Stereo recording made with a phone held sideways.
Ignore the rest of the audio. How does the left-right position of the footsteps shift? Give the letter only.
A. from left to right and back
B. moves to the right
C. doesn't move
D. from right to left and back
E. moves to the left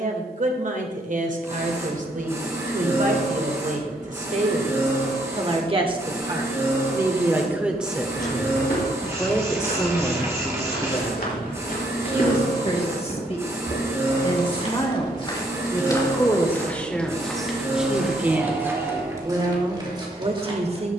B.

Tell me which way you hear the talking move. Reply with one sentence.
In this clip you hear the talking go left and come back.